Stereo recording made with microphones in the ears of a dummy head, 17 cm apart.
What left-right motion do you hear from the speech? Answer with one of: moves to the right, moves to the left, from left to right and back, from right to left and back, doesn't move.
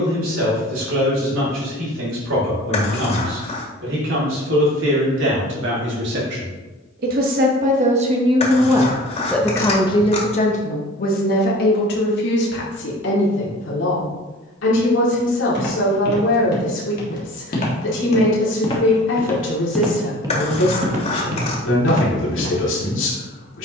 moves to the left.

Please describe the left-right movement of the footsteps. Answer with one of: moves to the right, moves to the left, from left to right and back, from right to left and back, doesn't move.
moves to the right.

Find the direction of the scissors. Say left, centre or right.
left.